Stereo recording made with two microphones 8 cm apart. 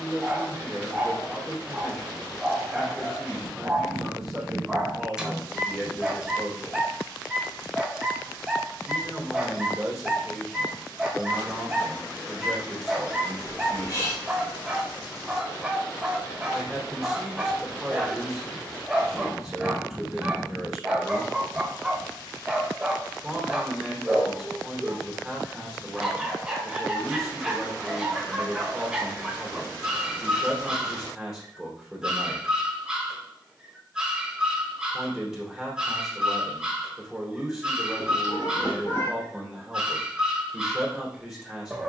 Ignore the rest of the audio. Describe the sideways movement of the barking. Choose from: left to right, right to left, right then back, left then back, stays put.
stays put.